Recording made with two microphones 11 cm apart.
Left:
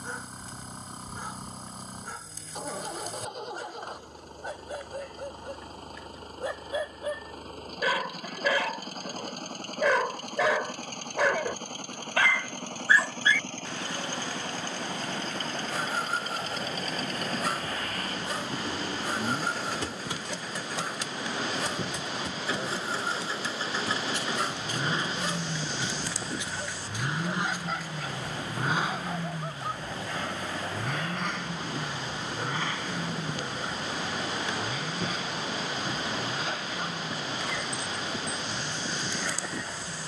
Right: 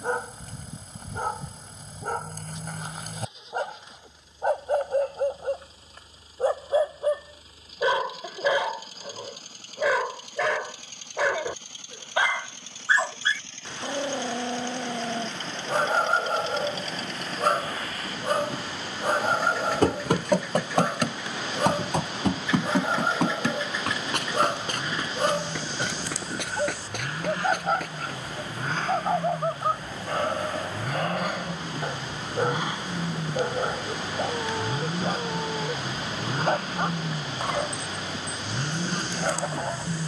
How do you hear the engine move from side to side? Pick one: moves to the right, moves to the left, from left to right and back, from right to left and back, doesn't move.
moves to the right.